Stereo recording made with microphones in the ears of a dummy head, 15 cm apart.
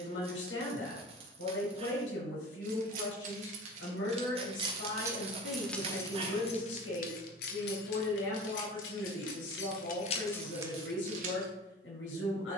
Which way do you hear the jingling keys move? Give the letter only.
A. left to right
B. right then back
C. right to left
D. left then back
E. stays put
D.